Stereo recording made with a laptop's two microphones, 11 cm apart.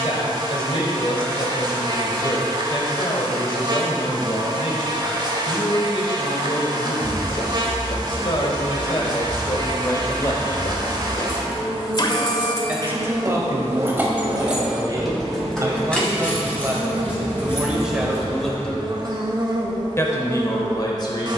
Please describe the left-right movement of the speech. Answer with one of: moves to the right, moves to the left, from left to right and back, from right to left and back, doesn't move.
from left to right and back.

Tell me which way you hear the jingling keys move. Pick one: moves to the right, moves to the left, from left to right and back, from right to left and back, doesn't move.
moves to the left.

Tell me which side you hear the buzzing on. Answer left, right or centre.
right.